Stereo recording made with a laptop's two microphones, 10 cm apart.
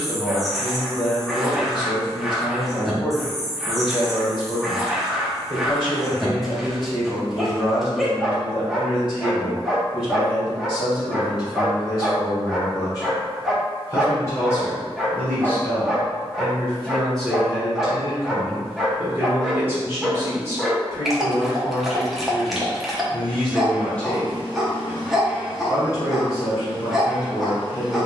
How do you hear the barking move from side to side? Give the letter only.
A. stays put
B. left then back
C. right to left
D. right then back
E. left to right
A.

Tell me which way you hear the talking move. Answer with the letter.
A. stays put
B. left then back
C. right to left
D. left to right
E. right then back
E.